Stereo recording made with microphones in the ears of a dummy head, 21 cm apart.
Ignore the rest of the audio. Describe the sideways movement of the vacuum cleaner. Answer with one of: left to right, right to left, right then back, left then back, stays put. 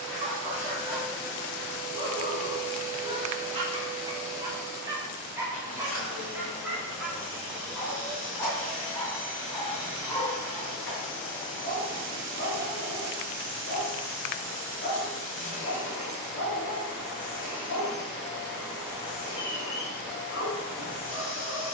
stays put.